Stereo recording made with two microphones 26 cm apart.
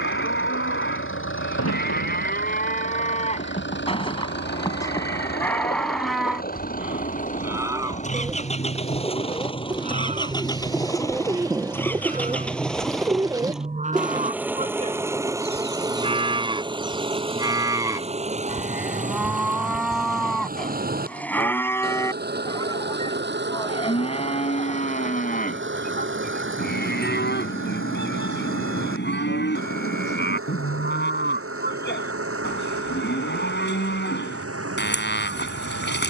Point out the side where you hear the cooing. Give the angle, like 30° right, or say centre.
10° right.